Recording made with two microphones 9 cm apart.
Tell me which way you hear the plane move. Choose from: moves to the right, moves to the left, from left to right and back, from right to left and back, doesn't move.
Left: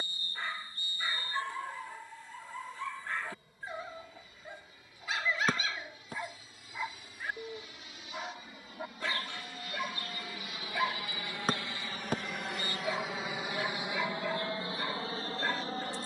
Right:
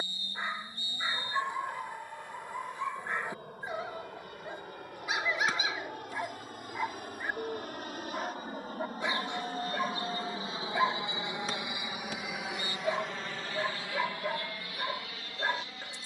moves to the left.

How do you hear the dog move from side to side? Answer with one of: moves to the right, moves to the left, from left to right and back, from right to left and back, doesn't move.
doesn't move.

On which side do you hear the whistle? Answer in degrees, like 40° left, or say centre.
50° left.